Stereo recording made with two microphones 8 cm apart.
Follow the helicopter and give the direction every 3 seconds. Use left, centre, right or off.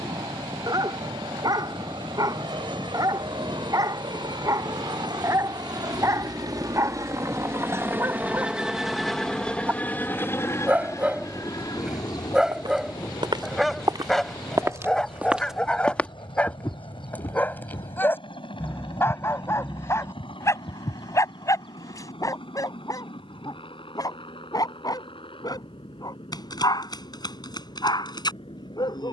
right, right, right, left, left, left, left, left, left, left.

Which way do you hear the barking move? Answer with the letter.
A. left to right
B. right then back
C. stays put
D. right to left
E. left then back
D.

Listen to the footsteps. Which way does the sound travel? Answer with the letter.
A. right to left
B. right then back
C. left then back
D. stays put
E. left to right
A.